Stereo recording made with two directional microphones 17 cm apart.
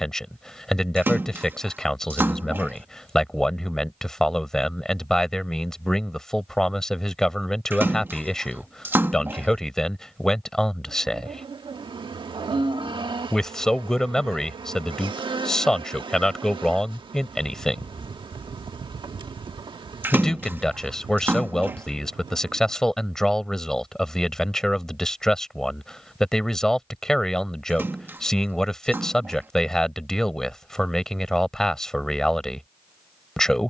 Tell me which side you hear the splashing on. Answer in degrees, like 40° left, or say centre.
10° right.